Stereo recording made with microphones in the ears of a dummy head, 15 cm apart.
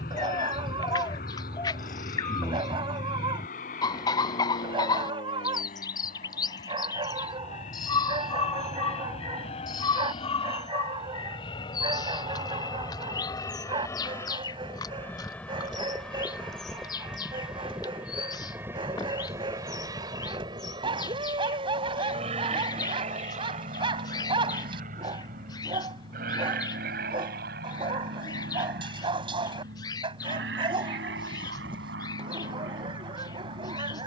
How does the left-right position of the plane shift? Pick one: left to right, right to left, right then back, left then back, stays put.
left to right.